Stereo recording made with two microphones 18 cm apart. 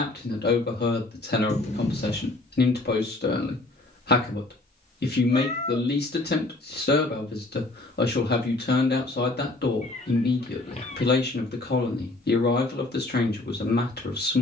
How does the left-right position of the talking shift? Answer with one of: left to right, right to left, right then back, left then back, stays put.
stays put.